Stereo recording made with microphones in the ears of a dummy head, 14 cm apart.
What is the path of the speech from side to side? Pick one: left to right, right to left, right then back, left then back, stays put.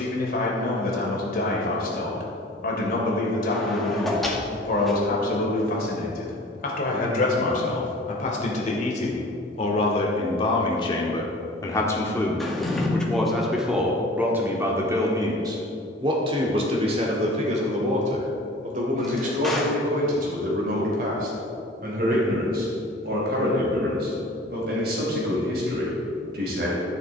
left to right.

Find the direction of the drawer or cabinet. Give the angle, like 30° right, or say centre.
centre.